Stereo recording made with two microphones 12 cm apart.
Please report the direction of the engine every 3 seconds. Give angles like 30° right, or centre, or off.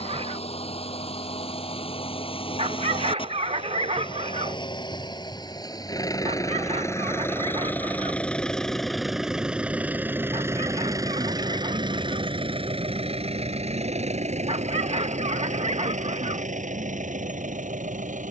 50° left, 40° left, 20° left, 20° right, 50° right, 70° right.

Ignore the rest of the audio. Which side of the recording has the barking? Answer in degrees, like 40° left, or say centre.
50° right.